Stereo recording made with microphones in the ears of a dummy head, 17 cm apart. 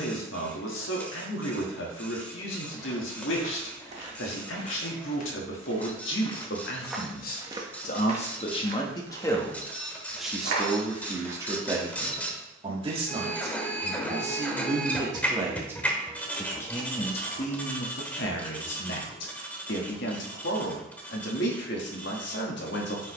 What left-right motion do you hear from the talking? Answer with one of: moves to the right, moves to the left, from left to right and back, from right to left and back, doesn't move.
from left to right and back.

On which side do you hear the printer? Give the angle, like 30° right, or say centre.
10° left.